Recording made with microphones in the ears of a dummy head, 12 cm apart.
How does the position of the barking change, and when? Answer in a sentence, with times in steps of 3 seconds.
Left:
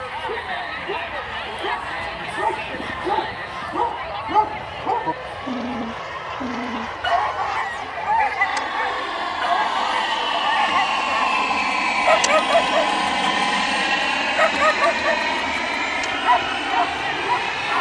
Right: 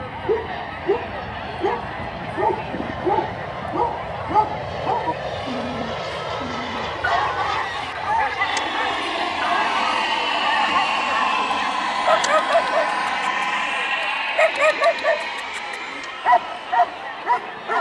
You can hear the barking on the right from 0 s, in the centre from 3 s, on the left from 6 s, in the centre from 12 s and on the right from 15 s.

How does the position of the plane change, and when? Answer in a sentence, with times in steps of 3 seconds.
You can hear the plane on the right from 0 s, in the centre from 9 s and on the left from 12 s.